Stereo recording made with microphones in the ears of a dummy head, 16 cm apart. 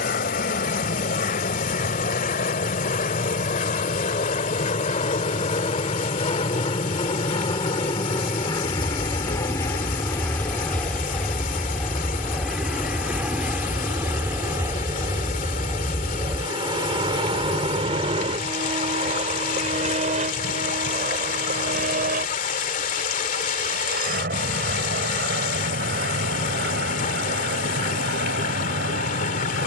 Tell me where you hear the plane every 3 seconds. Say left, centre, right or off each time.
left, left, left, centre, centre, right, right, right, right, right.